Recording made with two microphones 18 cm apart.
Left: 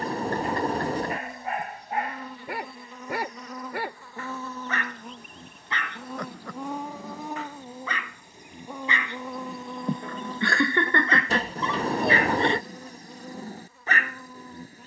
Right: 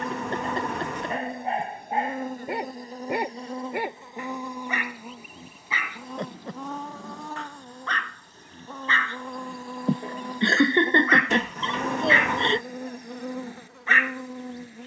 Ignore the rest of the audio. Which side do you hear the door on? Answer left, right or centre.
left.